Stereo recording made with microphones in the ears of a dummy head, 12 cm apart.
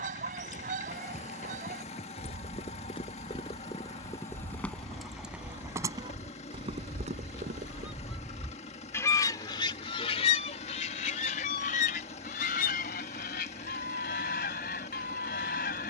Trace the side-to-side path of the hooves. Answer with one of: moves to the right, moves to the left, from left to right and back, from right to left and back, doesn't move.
moves to the right.